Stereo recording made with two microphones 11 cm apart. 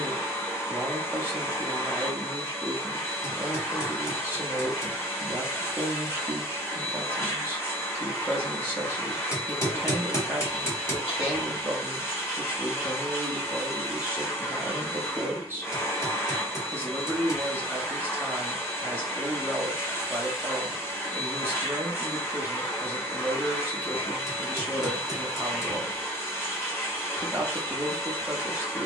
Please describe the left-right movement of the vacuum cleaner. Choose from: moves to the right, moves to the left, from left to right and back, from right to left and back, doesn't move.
doesn't move.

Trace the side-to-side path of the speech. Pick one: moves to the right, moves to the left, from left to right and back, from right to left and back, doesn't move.
doesn't move.